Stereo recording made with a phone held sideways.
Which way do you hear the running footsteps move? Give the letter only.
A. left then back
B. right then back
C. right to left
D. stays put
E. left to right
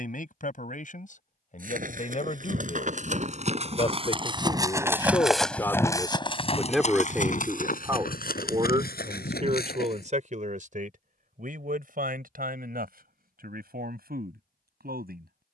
C.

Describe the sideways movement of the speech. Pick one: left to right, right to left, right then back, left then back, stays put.
left to right.